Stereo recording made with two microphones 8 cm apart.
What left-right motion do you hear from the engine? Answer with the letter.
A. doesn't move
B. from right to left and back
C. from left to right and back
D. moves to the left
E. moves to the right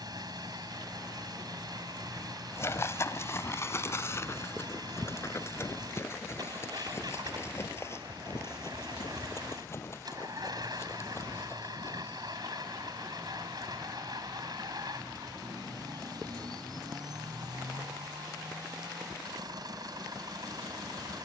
A.